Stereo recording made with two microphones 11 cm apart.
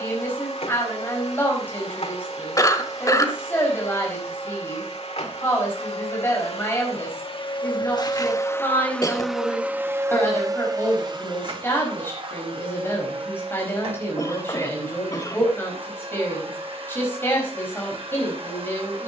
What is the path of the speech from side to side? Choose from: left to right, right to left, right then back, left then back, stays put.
stays put.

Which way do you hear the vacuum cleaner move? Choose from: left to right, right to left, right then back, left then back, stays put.
left to right.